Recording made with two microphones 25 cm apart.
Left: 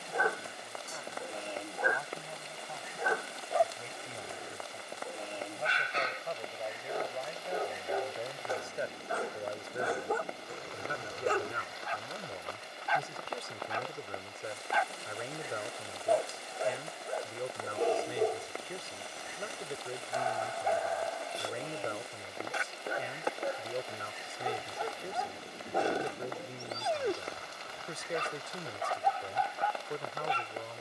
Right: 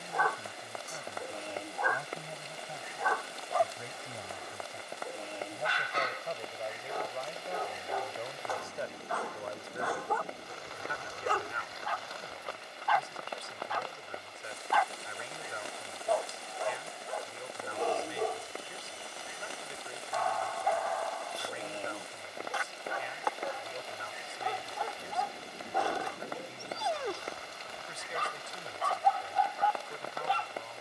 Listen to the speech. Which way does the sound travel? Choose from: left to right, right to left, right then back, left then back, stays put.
right to left.